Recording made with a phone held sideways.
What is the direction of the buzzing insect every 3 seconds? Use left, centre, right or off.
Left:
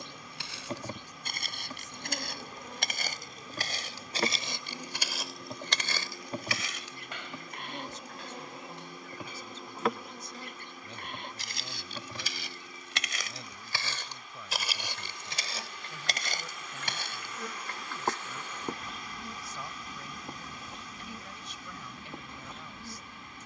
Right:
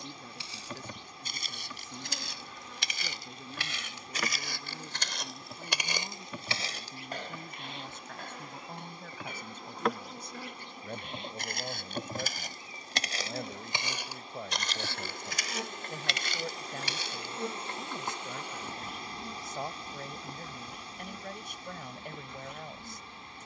left, left, left, centre, right, right, centre, left.